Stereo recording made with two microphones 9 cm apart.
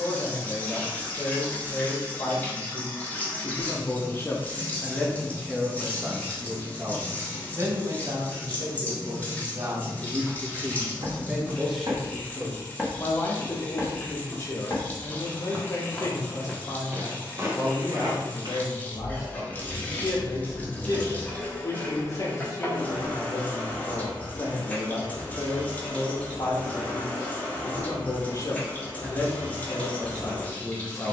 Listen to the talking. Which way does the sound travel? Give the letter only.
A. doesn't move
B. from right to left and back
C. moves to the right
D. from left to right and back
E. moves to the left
D.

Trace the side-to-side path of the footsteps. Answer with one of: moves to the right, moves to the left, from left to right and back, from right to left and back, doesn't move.
from right to left and back.